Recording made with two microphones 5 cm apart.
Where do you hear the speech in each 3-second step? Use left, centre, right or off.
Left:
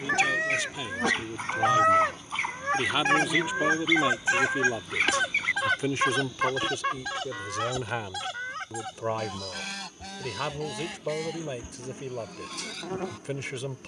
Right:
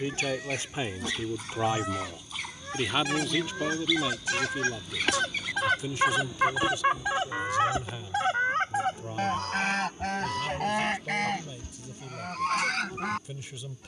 right, left, left, left, left.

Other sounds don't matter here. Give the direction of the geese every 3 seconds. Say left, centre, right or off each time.
left, left, right, right, right.